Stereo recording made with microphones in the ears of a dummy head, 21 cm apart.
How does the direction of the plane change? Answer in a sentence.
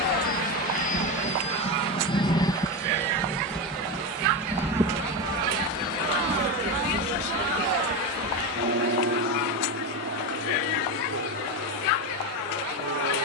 You can hear the plane travel towards the right.